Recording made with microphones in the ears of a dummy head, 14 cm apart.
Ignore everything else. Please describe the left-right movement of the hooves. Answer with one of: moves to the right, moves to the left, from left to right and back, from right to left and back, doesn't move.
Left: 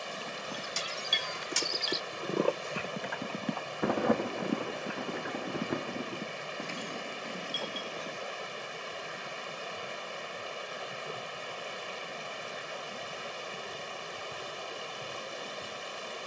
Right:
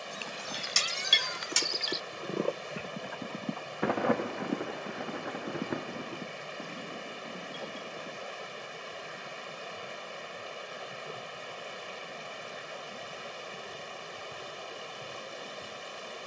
moves to the left.